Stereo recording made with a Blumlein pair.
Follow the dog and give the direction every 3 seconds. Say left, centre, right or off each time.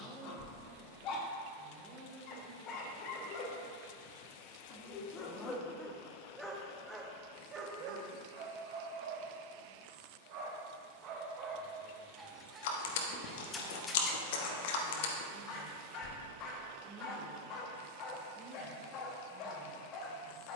left, left, right, right, centre, left, left.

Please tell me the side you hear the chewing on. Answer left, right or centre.
left.